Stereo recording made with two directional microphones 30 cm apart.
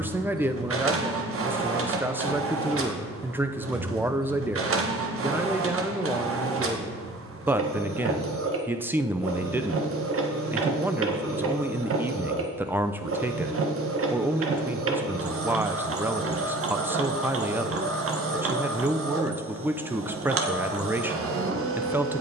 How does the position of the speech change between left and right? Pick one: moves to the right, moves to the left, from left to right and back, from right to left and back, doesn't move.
doesn't move.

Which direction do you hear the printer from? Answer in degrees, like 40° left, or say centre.
50° right.